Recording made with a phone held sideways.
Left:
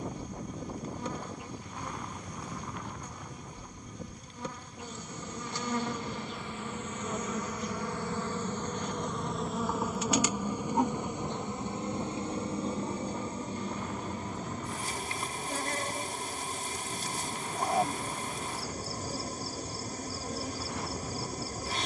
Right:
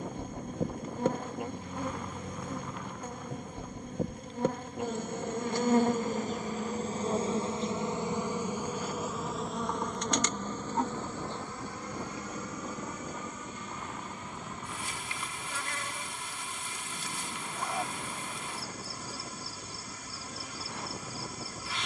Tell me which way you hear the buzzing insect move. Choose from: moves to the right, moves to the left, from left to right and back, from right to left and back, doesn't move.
moves to the left.